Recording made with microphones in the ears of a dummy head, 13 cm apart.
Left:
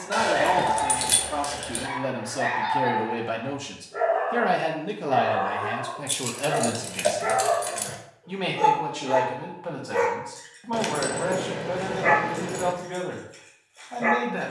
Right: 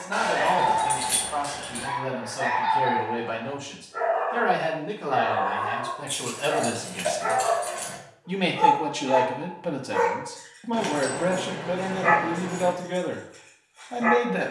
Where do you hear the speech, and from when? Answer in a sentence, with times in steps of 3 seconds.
You can hear the speech on the left from 0 s, in the centre from 6 s and on the right from 9 s.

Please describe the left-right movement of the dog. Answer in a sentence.
You can hear the dog stay put.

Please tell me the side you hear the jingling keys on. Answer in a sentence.
In this clip you hear the jingling keys on the left.